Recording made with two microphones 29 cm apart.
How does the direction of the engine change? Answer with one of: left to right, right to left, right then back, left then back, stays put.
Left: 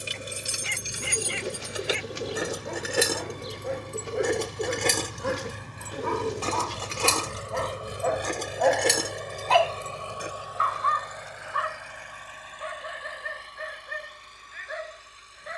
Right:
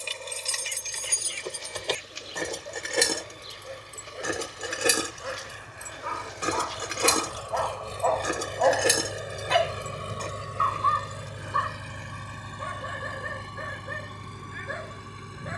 left to right.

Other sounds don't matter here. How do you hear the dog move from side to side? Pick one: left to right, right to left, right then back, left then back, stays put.
left to right.